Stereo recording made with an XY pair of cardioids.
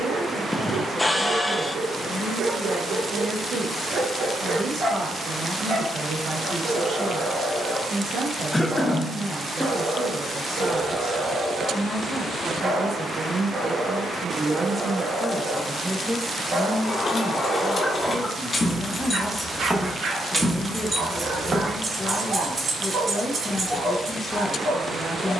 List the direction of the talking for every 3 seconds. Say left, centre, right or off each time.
right, right, right, right, right, centre, left, left, left.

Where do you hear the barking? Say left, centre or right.
right.